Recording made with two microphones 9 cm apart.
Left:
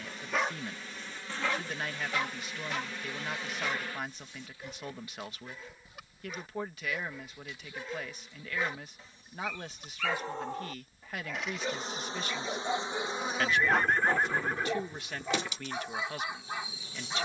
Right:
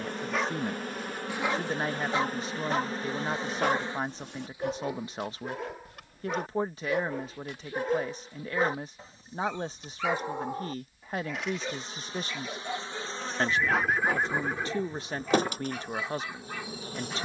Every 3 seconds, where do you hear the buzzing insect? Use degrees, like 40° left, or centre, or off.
50° right, 20° right, 20° left, 40° left, centre, 50° right.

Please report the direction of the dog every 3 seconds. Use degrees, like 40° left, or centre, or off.
20° right, 70° right, 60° right, 10° right, 20° left, 20° left.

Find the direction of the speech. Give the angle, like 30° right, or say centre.
30° right.